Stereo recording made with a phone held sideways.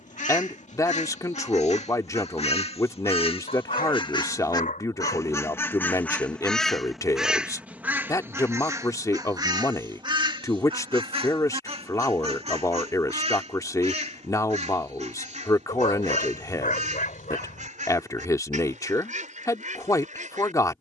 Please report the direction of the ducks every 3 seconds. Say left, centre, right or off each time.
left, left, centre, right, right, right, right.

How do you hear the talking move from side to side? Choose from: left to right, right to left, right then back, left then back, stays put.
stays put.